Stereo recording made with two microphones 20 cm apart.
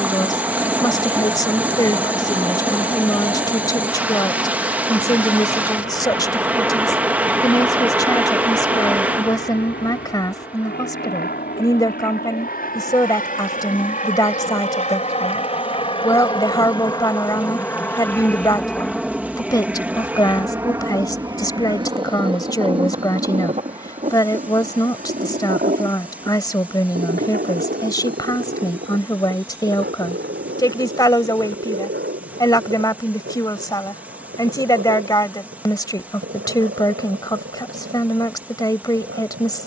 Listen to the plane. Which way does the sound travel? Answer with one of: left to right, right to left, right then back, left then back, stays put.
left to right.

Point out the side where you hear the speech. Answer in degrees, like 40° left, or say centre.
20° left.